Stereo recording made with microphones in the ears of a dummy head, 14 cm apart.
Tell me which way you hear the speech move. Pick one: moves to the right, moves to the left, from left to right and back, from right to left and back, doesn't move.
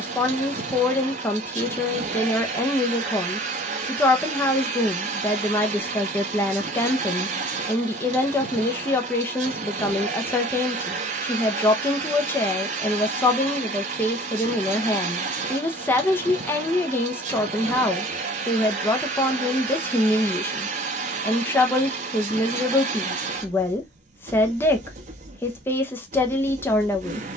doesn't move.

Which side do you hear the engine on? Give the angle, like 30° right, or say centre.
50° right.